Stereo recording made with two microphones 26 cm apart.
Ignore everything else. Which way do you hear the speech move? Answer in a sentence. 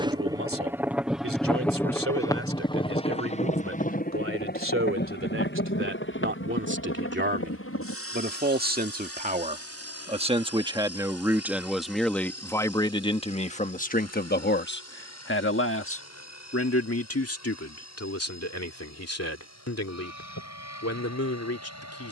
In this clip you hear the speech move to the left.